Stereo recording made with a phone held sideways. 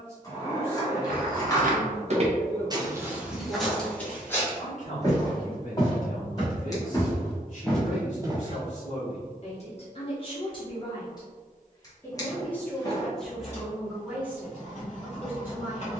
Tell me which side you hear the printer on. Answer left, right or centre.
left.